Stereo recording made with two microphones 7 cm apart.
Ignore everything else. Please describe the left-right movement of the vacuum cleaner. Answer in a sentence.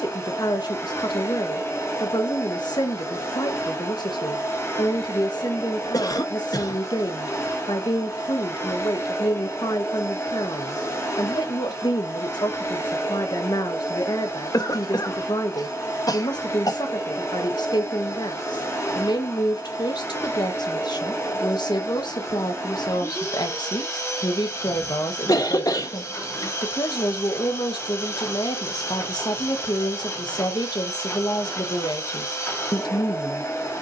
You can hear the vacuum cleaner stay put.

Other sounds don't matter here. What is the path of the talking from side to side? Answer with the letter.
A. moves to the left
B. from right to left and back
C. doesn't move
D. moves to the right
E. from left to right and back
C.